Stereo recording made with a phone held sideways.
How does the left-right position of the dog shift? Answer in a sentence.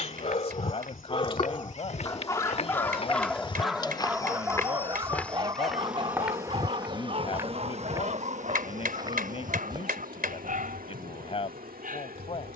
You can hear the dog travel towards the right.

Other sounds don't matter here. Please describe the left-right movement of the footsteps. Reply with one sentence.
In this clip you hear the footsteps move from left to right.